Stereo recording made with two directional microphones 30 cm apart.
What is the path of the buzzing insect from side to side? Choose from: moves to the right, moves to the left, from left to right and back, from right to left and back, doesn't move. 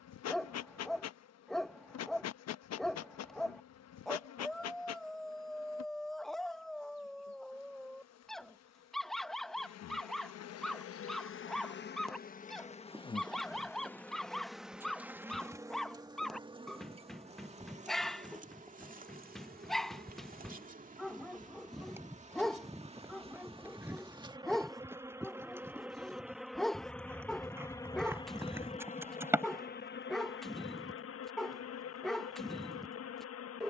from left to right and back.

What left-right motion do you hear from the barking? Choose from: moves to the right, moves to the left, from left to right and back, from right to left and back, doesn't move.
doesn't move.